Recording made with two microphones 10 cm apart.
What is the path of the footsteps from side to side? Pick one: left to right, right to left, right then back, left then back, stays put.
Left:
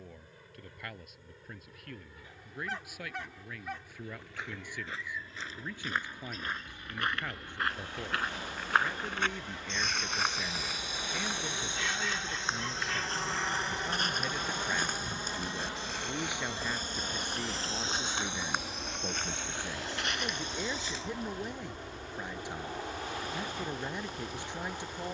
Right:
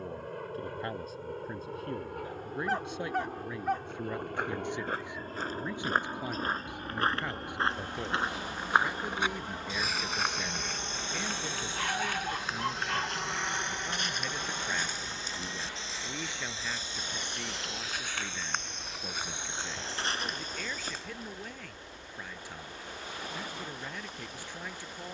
left then back.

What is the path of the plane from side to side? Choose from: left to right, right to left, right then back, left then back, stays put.
right to left.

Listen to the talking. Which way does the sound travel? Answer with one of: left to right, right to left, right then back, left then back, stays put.
right to left.